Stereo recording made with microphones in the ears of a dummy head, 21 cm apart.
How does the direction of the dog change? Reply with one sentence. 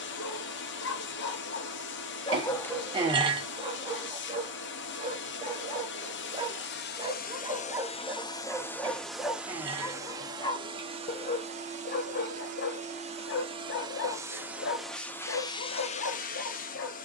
You can hear the dog go right and come back.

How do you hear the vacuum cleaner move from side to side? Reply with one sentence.
In this clip you hear the vacuum cleaner go right and come back.